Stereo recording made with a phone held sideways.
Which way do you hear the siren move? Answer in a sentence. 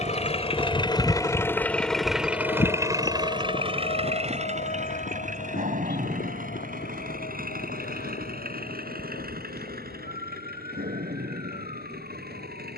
You can hear the siren move from right to left.